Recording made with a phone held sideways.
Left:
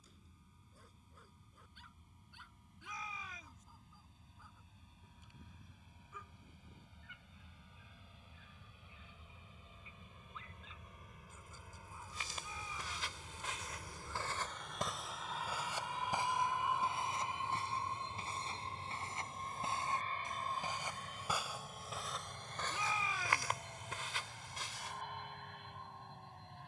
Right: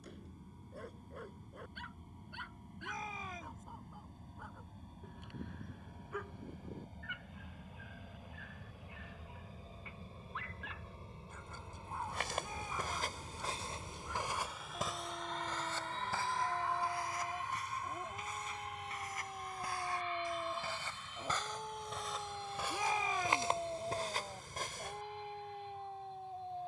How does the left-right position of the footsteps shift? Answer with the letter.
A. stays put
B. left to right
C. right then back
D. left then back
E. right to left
D.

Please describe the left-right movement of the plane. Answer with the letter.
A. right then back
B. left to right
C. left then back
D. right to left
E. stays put
D.